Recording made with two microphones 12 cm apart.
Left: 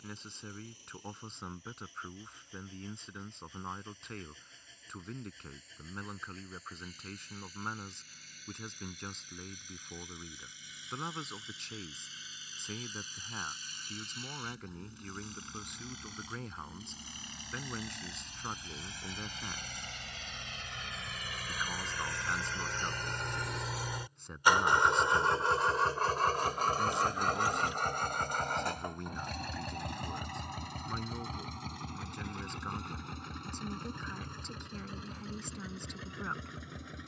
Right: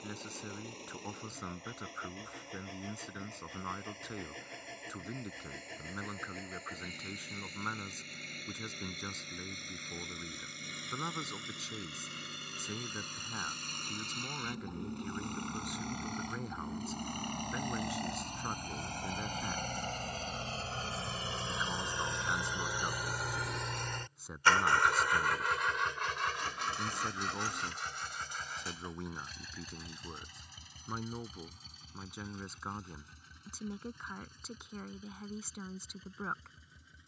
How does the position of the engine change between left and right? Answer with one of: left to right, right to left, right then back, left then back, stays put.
right to left.